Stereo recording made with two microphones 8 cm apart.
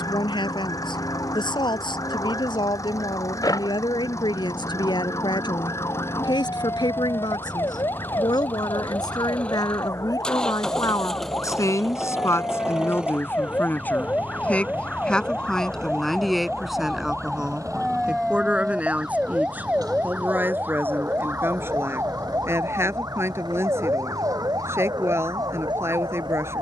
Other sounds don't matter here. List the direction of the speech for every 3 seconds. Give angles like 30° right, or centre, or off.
80° left, 80° left, 70° left, 50° left, 30° left, centre, 20° right, 30° right, 30° right.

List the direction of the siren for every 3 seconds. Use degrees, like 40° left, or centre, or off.
50° left, 50° left, 40° left, 40° left, 20° left, 10° left, 10° right, 40° right, 50° right.